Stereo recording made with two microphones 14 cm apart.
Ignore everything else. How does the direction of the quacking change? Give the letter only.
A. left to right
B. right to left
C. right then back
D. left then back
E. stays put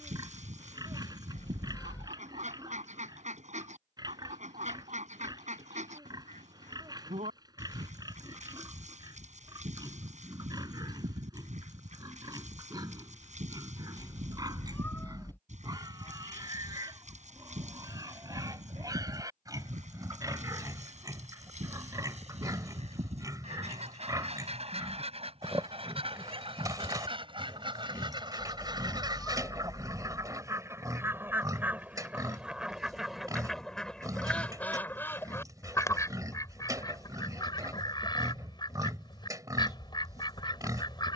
B.